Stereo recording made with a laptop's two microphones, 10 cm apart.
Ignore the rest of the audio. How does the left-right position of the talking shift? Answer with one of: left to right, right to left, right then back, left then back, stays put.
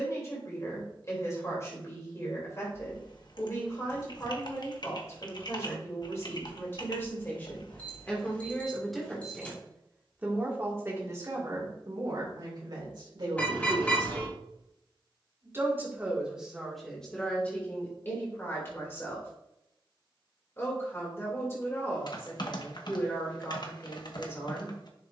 right then back.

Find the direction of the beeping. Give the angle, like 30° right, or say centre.
20° left.